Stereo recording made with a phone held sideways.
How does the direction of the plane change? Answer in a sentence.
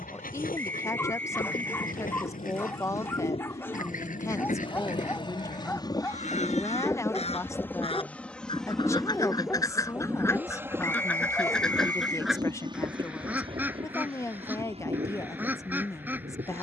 In this clip you hear the plane move to the right.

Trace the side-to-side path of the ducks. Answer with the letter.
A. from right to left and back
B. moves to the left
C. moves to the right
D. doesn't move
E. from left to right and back
C.